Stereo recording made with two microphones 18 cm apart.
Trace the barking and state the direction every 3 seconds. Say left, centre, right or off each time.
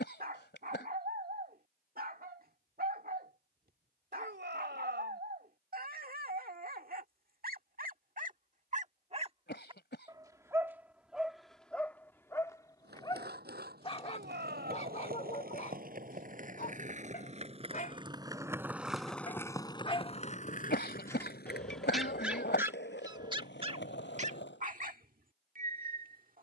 right, right, right, centre, left, left, left, centre, right.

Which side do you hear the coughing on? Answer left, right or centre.
left.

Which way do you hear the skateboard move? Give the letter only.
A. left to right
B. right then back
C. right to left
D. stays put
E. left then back
C.